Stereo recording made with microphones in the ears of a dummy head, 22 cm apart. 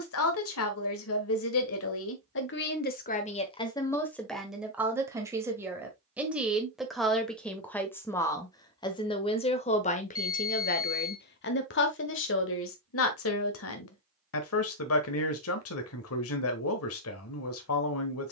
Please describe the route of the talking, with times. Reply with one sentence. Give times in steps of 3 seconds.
In this clip you hear the talking on the left from 0 s, in the centre from 3 s and on the left from 9 s.